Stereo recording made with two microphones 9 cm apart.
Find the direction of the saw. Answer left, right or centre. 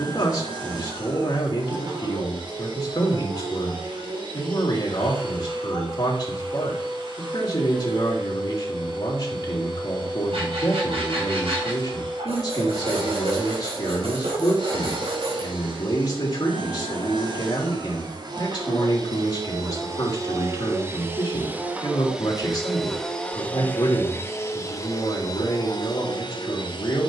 right.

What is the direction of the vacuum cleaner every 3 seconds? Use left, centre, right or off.
right, right, right, right, right, right, right, centre, left.